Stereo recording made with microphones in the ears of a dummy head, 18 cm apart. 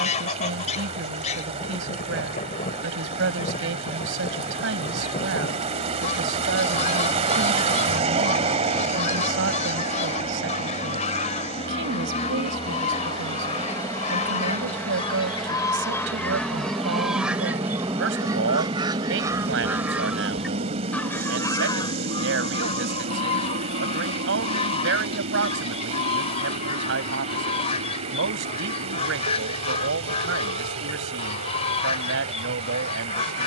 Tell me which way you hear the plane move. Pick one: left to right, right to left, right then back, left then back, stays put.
left to right.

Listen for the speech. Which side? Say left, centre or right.
right.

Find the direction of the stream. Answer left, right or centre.
right.